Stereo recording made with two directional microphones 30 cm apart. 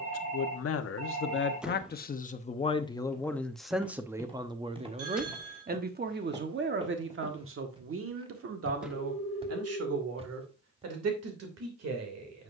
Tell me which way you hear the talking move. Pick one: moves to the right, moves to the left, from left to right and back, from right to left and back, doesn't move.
moves to the right.